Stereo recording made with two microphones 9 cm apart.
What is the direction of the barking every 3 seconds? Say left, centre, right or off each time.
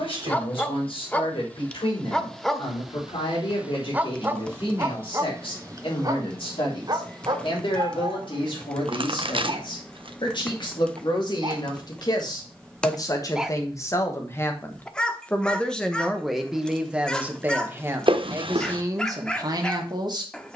centre, right, right, right, centre, centre, centre.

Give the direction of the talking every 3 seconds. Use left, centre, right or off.
left, left, left, left, left, centre, right.